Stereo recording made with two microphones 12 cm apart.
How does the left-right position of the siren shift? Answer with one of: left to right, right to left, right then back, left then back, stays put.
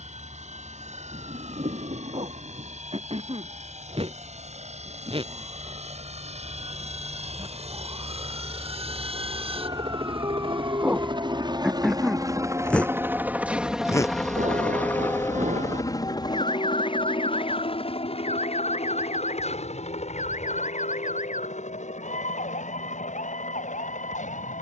right to left.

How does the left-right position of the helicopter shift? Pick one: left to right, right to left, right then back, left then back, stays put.
right to left.